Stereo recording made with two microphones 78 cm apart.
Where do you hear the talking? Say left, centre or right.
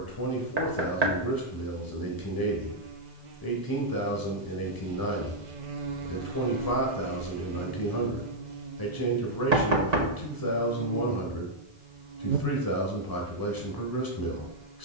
left.